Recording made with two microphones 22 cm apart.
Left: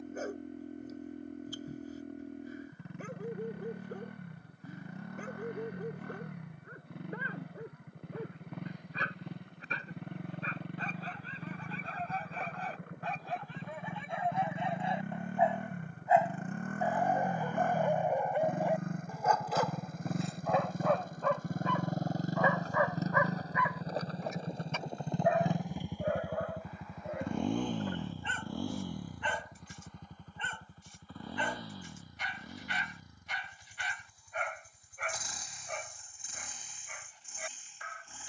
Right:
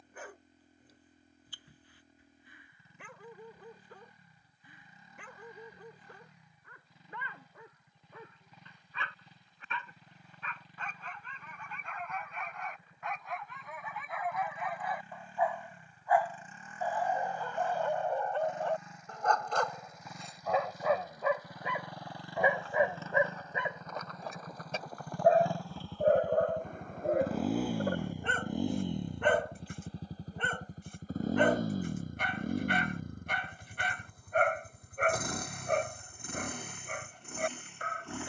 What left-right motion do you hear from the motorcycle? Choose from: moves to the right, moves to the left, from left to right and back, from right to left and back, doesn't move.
moves to the right.